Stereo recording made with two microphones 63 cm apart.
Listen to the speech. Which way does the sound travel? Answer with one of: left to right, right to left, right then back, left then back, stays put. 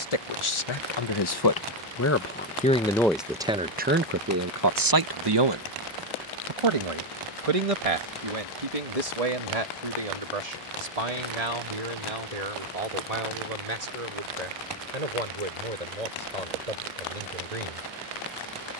left to right.